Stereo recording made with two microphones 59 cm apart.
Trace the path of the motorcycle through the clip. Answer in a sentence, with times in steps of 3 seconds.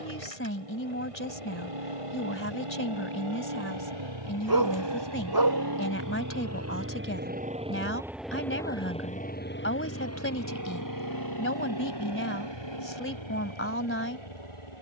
In this clip you hear the motorcycle on the right from 0 s, in the centre from 6 s and on the left from 9 s.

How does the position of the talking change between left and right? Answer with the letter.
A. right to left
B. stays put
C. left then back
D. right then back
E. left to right
B.